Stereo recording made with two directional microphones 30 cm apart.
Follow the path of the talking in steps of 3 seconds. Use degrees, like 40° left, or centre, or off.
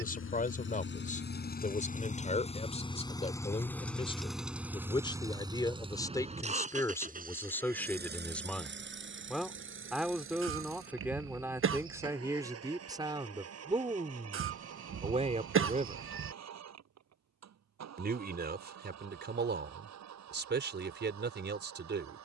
20° left, 20° left, 10° left, centre, 10° right, 20° right, 30° right, 40° right.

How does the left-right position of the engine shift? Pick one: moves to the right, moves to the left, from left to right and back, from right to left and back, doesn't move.
moves to the right.